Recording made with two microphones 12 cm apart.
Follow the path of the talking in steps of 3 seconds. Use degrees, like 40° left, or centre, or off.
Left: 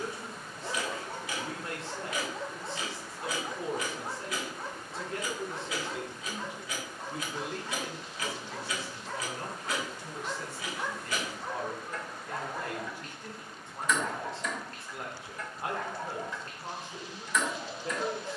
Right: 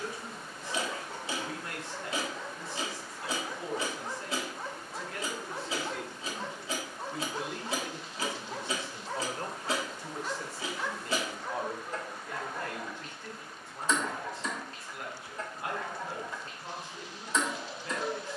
30° left, 30° left, 10° right, 30° right, 10° left, 30° left.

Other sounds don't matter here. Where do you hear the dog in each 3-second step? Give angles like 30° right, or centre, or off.
50° left, centre, 30° right, centre, 50° left, 50° left.